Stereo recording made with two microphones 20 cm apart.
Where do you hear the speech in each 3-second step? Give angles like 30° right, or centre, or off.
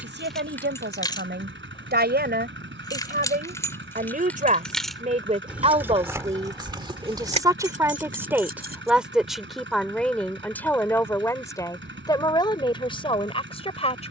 50° right, 40° right, 20° right, 10° left, 20° left.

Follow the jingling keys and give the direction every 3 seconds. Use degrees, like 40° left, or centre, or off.
10° left, 10° left, 30° right, off, off.